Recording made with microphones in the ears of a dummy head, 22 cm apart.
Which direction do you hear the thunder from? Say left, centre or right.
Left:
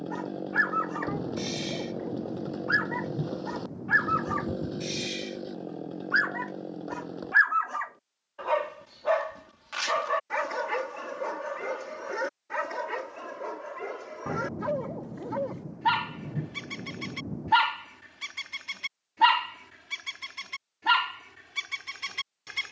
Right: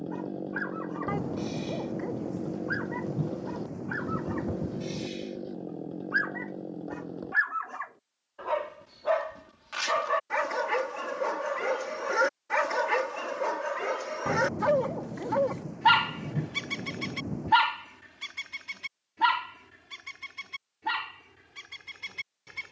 right.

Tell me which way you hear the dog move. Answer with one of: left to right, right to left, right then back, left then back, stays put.
right then back.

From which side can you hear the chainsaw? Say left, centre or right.
left.